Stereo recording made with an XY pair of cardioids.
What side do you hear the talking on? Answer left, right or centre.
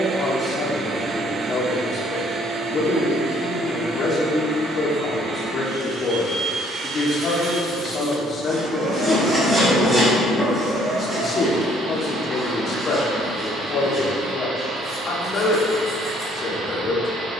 left.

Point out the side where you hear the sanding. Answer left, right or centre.
centre.